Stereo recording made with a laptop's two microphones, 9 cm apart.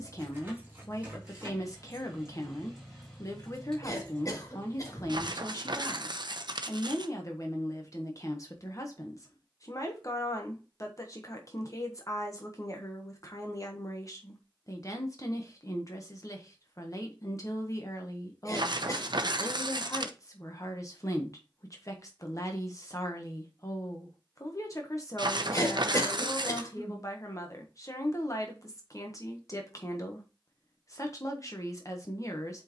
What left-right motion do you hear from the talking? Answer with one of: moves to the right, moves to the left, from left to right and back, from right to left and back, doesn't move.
doesn't move.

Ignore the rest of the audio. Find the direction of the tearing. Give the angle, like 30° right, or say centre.
60° right.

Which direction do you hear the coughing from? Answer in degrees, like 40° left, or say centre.
40° left.